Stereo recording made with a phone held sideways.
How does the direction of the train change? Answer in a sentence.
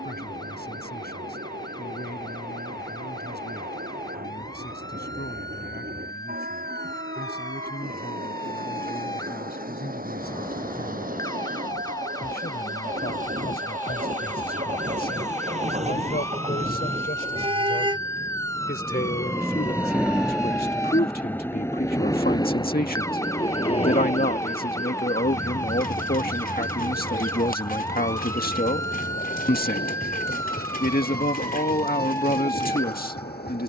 You can hear the train go from the right side to the left.